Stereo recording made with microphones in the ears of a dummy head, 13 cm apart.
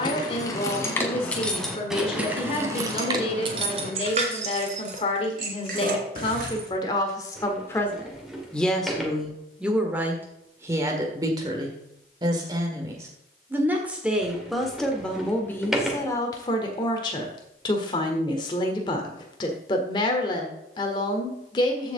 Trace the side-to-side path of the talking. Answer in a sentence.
You can hear the talking move from left to right and back again.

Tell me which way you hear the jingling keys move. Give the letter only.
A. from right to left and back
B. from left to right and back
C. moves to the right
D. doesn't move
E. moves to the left
C.